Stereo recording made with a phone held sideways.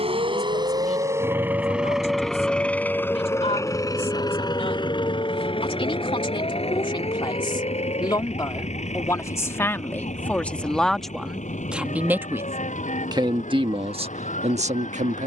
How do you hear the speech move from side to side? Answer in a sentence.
In this clip you hear the speech go from the left side to the right.